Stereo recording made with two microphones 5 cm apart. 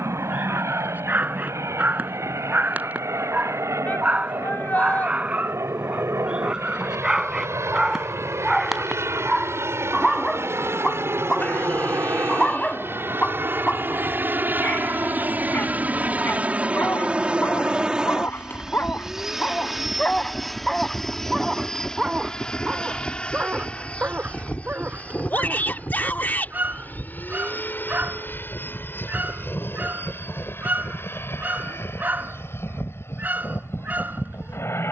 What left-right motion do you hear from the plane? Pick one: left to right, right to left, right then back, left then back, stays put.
right to left.